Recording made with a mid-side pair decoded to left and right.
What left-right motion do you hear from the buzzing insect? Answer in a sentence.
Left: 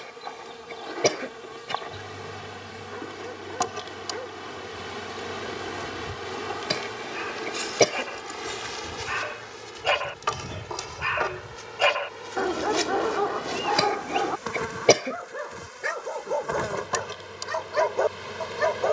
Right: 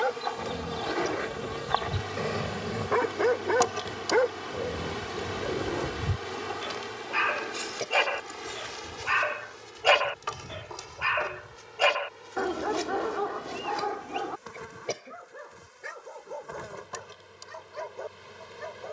In this clip you hear the buzzing insect move to the left.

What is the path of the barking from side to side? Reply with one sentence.
You can hear the barking go from the right side to the left.